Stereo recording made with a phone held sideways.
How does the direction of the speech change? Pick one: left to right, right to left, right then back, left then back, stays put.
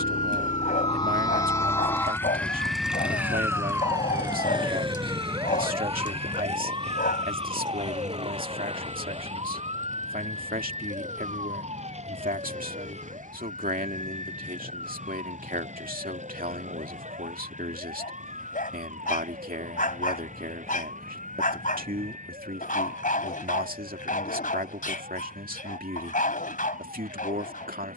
stays put.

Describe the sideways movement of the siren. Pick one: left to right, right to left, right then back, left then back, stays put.
left to right.